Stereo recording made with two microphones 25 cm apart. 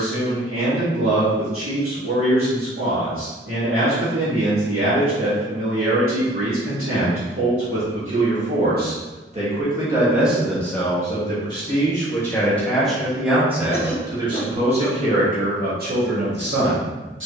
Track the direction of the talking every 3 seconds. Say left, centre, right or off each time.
right, right, right, centre, centre, right.